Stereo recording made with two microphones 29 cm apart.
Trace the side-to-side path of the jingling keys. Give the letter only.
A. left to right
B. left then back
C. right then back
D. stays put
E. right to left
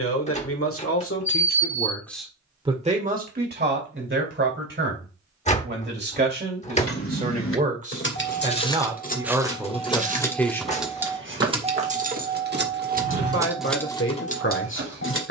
C.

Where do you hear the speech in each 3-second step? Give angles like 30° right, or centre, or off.
30° left, 40° right, 30° right, centre, 40° left.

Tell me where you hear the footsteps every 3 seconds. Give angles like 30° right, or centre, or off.
off, off, 20° left, 30° right, 50° right.